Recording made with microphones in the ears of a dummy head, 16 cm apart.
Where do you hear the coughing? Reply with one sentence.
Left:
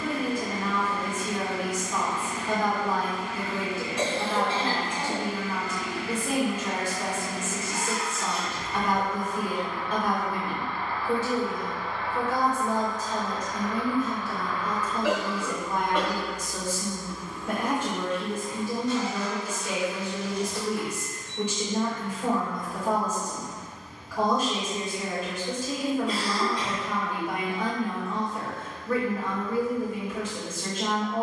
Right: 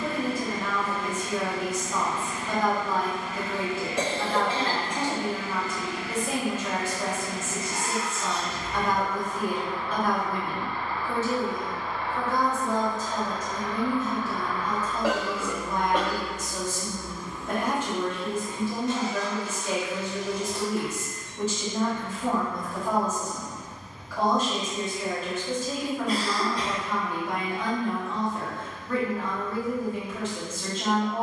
In this clip you hear the coughing on the right.